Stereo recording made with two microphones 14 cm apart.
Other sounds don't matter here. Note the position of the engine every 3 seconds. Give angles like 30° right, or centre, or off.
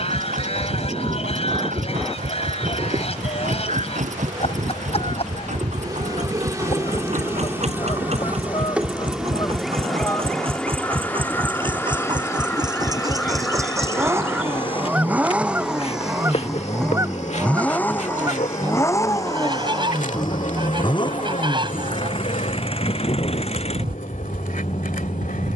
70° right, 60° right, 50° right, 40° right, 20° right, centre, 20° left, 40° left, 50° left.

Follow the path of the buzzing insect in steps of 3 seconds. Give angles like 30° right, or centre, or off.
40° right, 30° right, 20° right, 10° left, 30° left, 50° left, 60° left, 70° left, 80° left.